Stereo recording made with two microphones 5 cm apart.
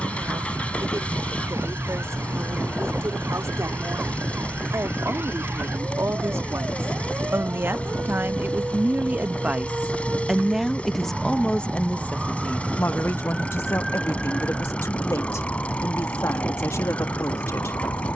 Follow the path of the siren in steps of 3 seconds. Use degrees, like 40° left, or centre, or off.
50° right, 50° right, 40° right, 20° right, centre, 40° left.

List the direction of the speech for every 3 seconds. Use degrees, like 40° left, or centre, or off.
60° right, 60° right, 40° right, centre, 50° left, 60° left.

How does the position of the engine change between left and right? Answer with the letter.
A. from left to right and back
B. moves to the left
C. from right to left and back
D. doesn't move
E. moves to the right
D.